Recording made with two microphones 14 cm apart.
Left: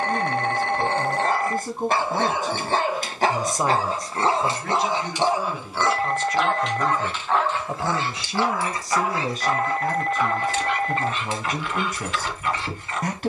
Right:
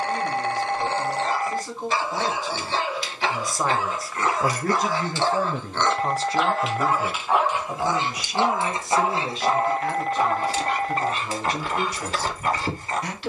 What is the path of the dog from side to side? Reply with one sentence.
In this clip you hear the dog move to the right.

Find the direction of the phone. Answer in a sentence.
In this clip you hear the phone in the centre.